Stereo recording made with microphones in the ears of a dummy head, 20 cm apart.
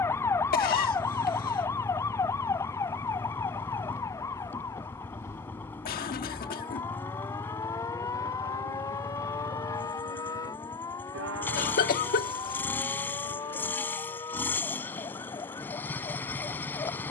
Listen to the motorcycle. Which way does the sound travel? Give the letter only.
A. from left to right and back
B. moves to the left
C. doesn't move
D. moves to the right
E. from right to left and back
C.